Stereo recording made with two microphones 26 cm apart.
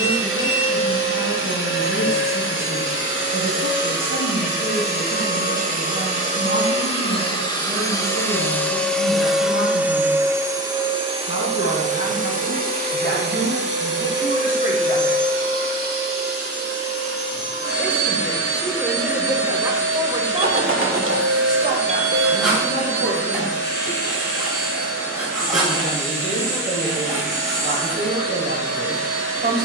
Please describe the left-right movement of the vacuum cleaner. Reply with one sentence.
In this clip you hear the vacuum cleaner travel towards the right.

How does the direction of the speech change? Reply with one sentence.
You can hear the speech travel towards the right.